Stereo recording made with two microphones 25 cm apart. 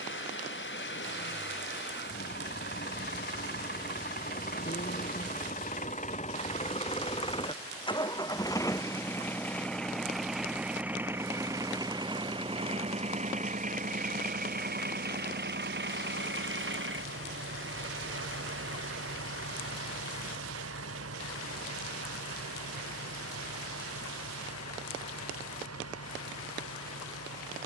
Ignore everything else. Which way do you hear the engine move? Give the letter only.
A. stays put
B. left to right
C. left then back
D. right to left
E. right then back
B.